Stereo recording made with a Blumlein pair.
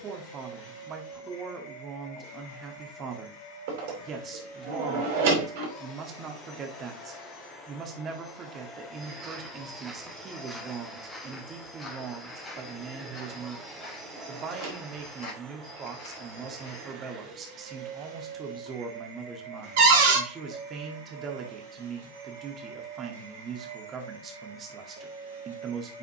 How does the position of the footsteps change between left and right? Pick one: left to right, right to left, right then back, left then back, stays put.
right to left.